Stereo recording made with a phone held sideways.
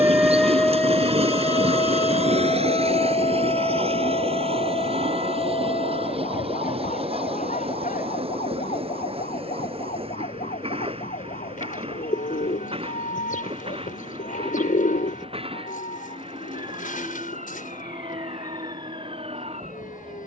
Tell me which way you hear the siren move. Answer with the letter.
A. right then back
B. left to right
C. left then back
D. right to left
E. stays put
D.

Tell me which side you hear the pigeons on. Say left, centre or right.
left.